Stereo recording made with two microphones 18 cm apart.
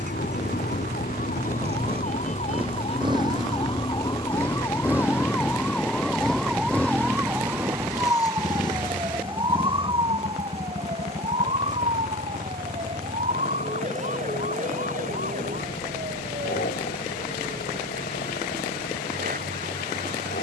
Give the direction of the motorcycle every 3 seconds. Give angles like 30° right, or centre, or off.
40° right, 20° right, 10° left, 40° left, 50° left, 60° left, 60° left.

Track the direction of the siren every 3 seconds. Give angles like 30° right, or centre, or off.
50° left, 20° left, 10° right, 30° right, 40° right, 50° right, 50° right.